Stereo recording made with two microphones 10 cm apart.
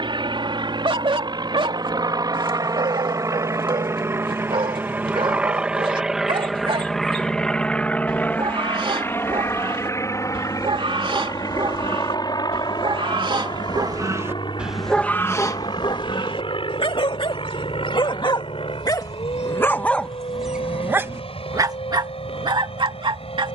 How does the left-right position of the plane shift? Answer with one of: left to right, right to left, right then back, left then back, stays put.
right to left.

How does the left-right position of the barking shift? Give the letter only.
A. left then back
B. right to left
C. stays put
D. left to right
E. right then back
A.